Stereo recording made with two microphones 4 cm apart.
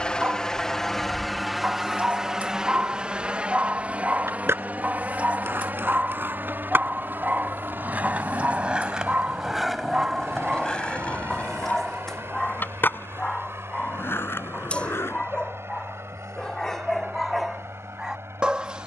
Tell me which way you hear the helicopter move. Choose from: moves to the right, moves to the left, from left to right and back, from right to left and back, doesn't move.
moves to the right.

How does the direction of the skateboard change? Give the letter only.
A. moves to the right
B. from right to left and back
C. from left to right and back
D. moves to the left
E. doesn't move
D.